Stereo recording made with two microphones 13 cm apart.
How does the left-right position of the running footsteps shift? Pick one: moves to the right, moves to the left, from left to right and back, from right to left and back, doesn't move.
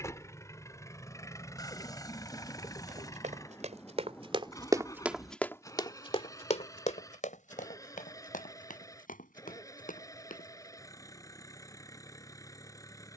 moves to the left.